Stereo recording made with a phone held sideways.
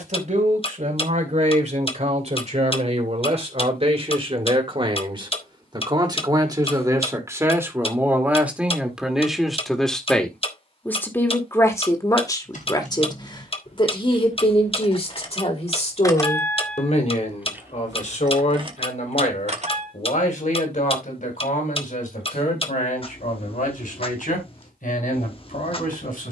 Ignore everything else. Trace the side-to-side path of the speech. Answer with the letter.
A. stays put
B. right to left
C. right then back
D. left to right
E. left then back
B.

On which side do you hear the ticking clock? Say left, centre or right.
left.